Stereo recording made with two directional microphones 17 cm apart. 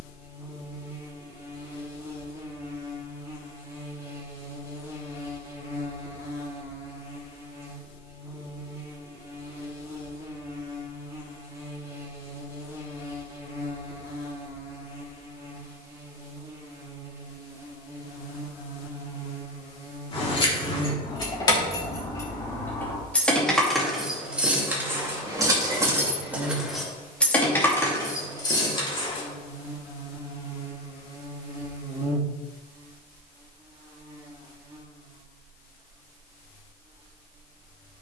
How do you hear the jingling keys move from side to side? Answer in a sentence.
You can hear the jingling keys move from left to right and back again.